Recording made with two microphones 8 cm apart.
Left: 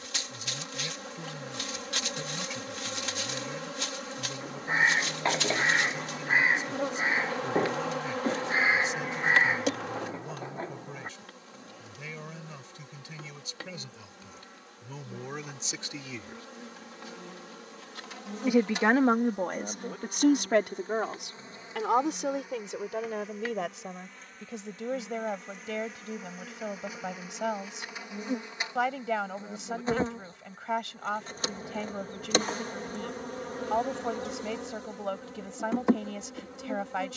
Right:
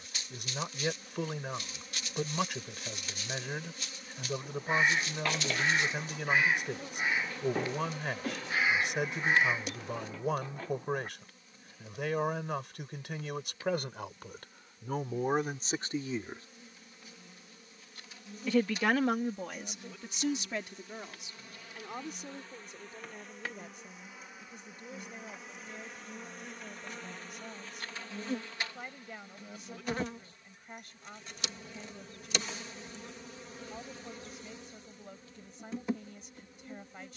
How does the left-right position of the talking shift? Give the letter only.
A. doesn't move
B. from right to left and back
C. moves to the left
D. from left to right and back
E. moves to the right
C.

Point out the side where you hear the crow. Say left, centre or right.
left.